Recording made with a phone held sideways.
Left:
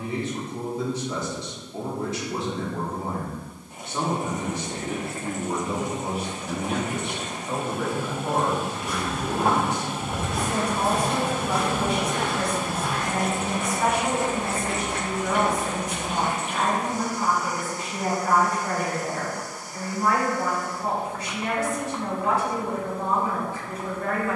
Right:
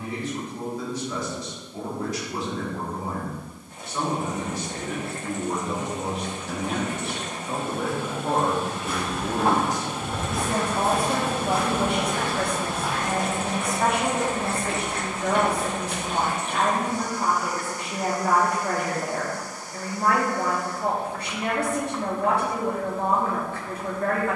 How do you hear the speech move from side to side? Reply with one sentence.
In this clip you hear the speech go from the left side to the right.